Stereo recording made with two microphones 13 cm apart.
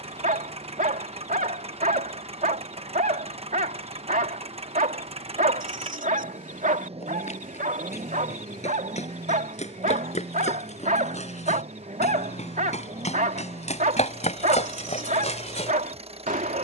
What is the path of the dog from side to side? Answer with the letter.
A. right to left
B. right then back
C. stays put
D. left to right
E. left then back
C.